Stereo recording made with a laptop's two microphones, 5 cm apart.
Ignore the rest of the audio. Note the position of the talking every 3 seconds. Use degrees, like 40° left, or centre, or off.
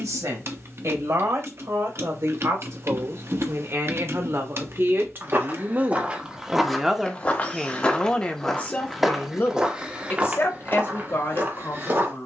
70° right, 50° right, 10° left, 50° left.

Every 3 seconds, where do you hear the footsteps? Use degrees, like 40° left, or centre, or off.
off, 40° right, 10° left, 30° right.